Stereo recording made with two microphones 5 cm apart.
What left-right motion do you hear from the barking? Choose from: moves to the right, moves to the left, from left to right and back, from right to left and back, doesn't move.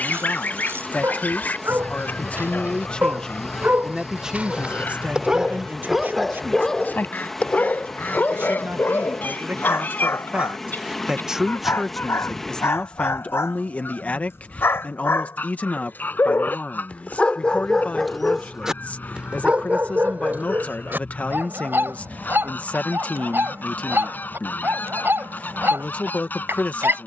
from right to left and back.